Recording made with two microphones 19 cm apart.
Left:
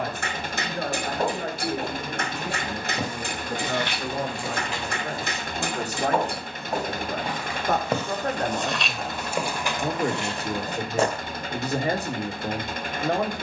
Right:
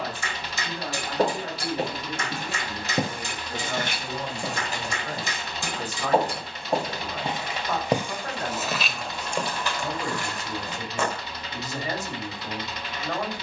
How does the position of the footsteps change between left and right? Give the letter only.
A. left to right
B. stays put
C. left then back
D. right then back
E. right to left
E.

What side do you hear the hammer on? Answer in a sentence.
You can hear the hammer on the left.